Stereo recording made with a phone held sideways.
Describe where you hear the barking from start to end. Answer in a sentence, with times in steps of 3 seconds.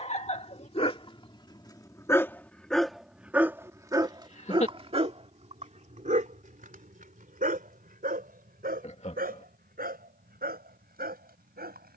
You can hear the barking on the left from 0 s and on the right from 3 s.